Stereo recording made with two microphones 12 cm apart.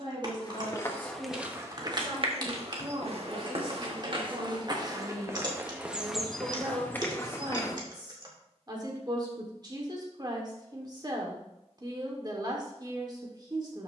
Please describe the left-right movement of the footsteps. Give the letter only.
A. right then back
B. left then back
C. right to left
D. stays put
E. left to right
A.